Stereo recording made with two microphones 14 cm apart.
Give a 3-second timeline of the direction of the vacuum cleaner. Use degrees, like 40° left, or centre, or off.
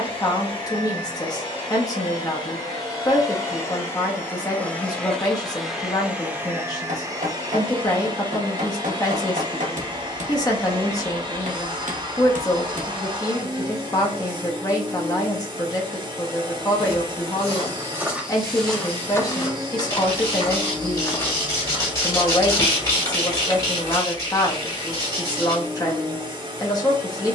30° left, 10° left, 30° right, 30° right, 30° right, 30° right, 30° right, 30° right, 30° right.